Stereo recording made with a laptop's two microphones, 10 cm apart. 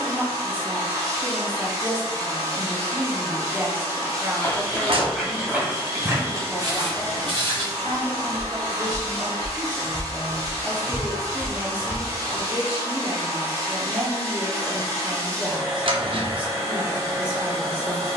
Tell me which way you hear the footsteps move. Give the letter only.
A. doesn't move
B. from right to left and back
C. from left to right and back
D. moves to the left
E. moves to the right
C.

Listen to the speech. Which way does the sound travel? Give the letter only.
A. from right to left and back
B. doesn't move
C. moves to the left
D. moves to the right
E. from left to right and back
A.